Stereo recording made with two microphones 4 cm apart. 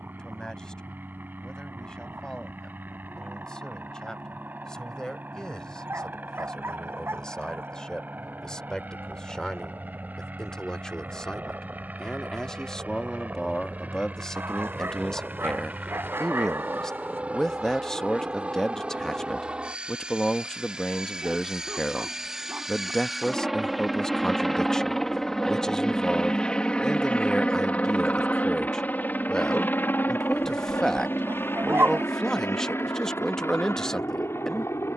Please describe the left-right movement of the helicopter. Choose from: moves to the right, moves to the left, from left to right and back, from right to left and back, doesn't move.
moves to the left.